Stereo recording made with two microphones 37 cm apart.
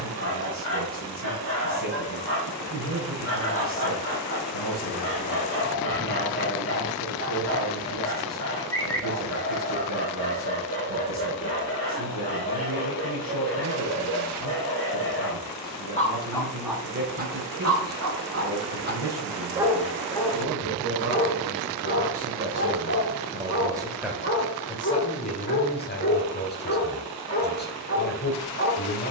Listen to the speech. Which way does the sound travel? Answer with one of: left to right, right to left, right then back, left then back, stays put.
right to left.